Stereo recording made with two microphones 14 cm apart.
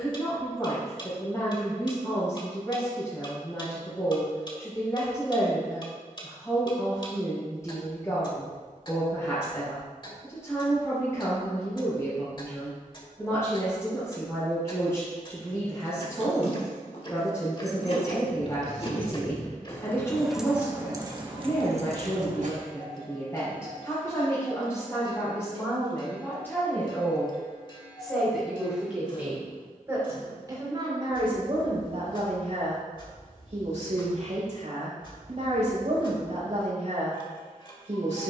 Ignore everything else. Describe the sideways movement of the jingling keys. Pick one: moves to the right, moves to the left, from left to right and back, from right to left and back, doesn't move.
moves to the right.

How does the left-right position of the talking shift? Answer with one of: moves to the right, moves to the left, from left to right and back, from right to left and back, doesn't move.
moves to the right.